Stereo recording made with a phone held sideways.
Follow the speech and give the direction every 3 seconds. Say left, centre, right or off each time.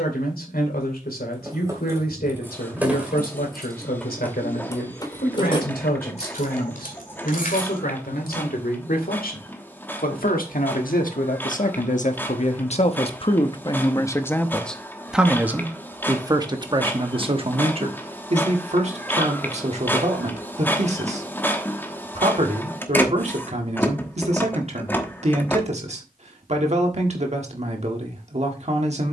left, left, left, left, left, right, right, right, right, right.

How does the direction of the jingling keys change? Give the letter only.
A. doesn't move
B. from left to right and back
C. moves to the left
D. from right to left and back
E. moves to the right
C.